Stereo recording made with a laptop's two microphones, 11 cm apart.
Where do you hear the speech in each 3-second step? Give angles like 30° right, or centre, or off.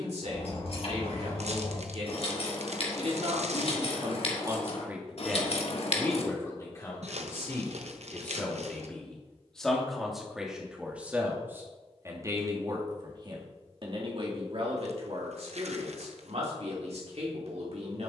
70° right, 30° right, 20° left, 10° right, 40° right, 70° right.